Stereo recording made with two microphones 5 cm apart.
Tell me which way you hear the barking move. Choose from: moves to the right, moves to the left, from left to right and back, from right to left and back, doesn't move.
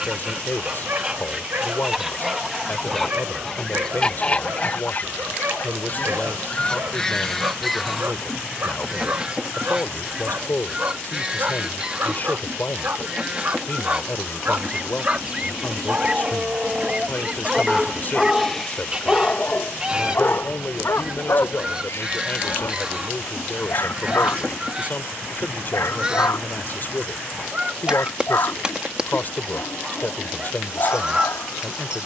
moves to the left.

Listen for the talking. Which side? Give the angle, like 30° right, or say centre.
40° left.